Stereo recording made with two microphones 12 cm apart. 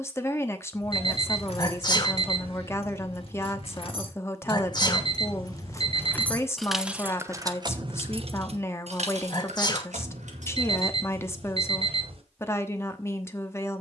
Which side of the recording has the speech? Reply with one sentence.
You can hear the speech on the left.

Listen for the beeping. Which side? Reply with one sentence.
In this clip you hear the beeping on the right.